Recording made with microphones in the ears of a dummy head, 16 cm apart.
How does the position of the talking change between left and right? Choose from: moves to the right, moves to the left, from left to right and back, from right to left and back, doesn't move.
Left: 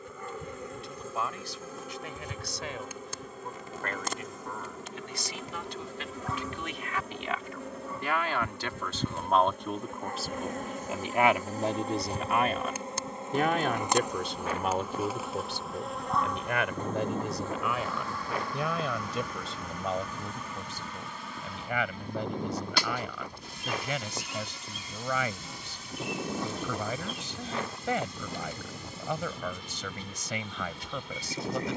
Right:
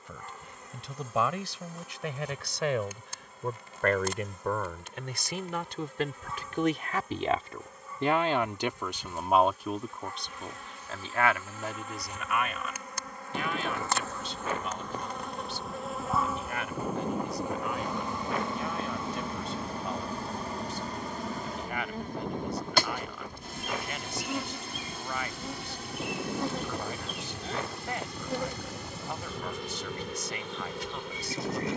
moves to the left.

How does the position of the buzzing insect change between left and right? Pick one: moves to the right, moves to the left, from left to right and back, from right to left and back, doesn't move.
moves to the right.